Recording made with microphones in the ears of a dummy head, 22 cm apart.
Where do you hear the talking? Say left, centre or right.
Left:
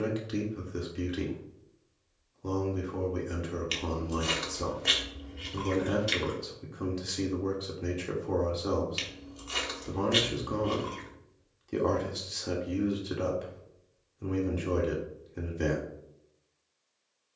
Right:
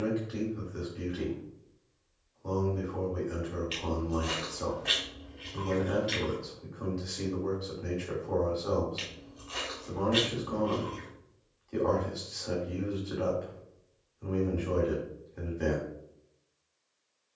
left.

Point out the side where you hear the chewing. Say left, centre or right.
left.